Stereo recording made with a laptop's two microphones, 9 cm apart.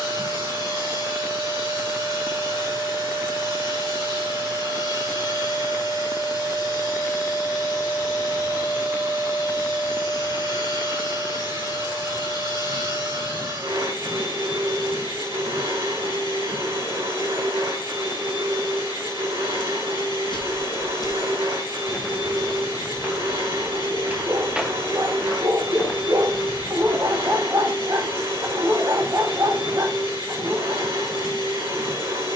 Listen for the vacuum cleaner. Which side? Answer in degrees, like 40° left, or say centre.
70° right.